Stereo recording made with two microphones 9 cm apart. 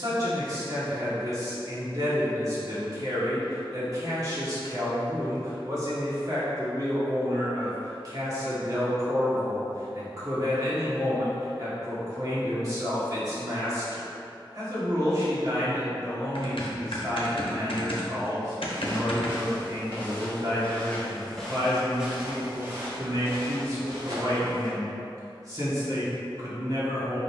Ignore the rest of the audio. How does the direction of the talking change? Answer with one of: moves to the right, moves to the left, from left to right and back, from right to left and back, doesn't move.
doesn't move.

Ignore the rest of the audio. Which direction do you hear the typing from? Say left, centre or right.
left.